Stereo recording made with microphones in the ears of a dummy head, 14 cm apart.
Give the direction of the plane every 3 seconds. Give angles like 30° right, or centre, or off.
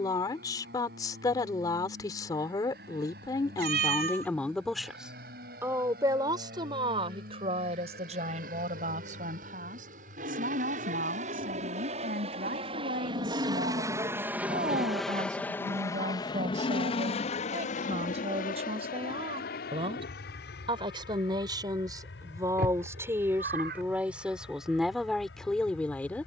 70° right, 70° right, 70° right, 50° right, 20° right, 30° left, 60° left, 70° left, 80° left.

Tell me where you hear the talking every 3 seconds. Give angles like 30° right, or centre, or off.
20° left, 10° left, 40° right, 60° right, 50° right, 50° right, 40° right, 20° right, centre.